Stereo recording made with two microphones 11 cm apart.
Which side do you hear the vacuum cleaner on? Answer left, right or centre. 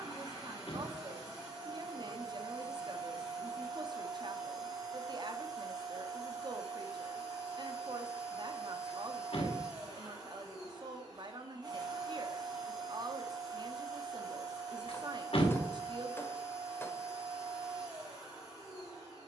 right.